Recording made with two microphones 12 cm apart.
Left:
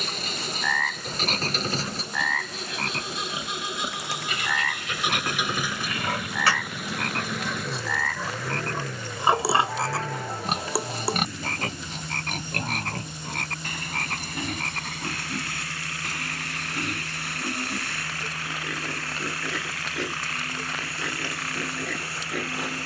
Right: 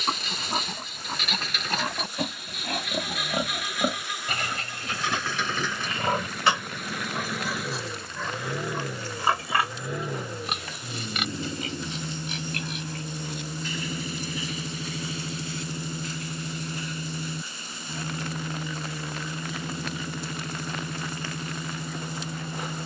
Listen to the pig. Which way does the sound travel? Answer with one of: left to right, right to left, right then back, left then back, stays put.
right to left.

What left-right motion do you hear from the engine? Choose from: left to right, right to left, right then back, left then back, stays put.
left to right.